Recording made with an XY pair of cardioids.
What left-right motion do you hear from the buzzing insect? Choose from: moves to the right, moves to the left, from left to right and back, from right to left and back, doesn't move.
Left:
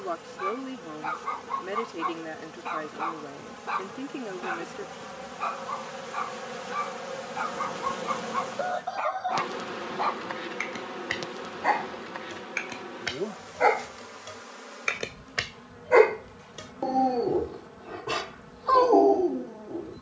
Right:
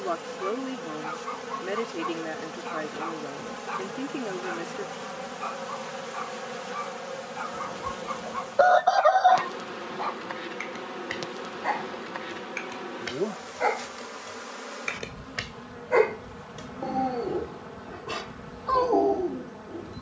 from right to left and back.